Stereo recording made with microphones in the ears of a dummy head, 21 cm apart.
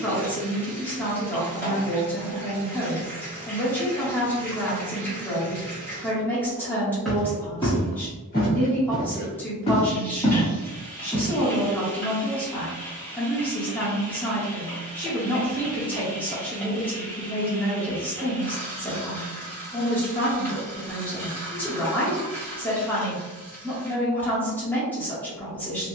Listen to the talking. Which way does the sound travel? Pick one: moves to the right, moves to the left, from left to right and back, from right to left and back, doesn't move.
doesn't move.